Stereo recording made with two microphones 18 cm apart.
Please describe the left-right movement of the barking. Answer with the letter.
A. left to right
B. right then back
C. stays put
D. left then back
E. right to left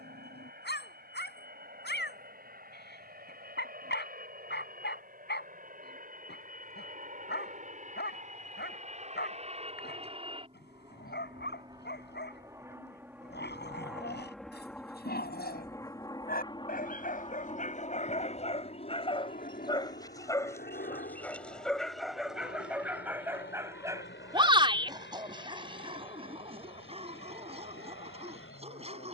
A.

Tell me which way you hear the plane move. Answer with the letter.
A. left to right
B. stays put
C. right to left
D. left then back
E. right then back
C.